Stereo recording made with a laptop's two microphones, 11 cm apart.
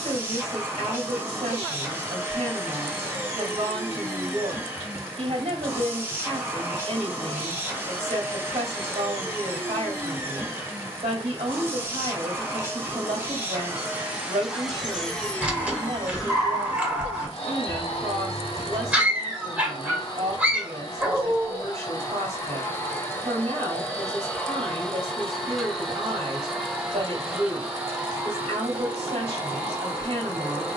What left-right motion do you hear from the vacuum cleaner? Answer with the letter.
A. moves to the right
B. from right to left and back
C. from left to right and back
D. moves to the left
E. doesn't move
B.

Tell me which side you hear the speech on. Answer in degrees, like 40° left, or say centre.
80° right.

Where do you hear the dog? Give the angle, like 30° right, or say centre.
10° right.